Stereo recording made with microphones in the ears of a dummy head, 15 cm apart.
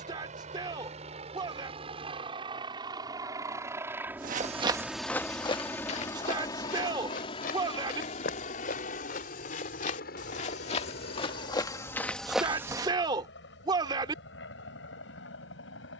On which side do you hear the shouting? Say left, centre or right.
right.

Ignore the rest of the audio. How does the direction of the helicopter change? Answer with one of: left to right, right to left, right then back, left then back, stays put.
right to left.